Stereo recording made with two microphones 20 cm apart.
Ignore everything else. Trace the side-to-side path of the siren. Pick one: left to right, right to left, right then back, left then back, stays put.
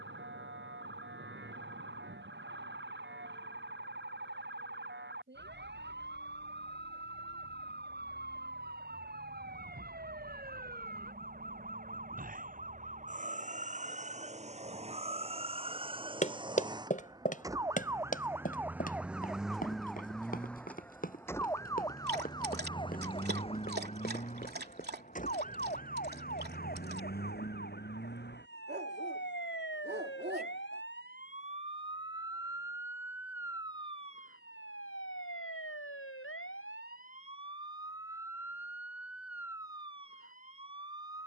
right to left.